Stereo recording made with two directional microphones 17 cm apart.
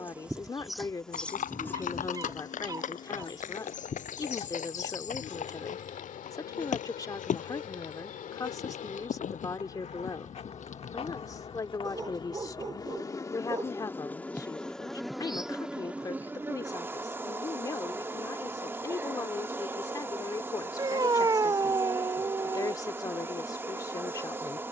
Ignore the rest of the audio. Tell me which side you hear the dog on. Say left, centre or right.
right.